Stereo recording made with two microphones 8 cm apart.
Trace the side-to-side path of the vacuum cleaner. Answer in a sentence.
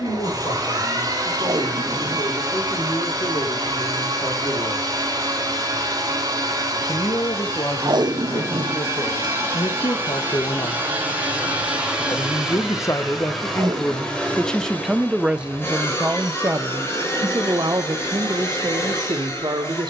You can hear the vacuum cleaner move from right to left.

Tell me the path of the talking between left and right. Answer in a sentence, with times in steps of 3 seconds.
You can hear the talking on the left from 0 s and on the right from 15 s.